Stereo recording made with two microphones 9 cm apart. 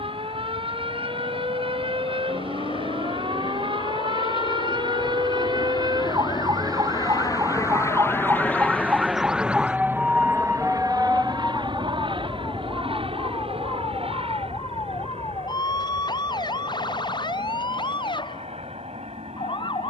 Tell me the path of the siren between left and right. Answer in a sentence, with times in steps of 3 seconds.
You can hear the siren on the right from 0 s, in the centre from 9 s and on the left from 12 s.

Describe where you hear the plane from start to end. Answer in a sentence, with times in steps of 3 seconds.
You can hear the plane on the left from 0 s and on the right from 9 s.